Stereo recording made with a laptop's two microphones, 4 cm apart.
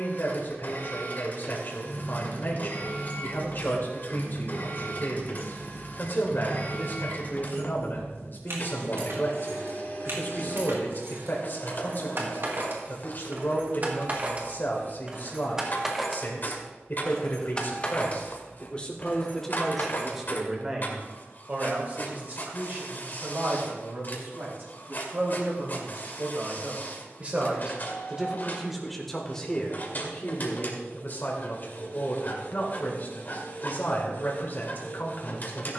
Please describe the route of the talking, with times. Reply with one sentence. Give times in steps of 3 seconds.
You can hear the talking on the left from 0 s, in the centre from 18 s, on the right from 21 s, in the centre from 27 s and on the left from 30 s.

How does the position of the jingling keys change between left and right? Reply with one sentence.
You can hear the jingling keys go right and come back.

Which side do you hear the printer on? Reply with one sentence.
You can hear the printer on the left.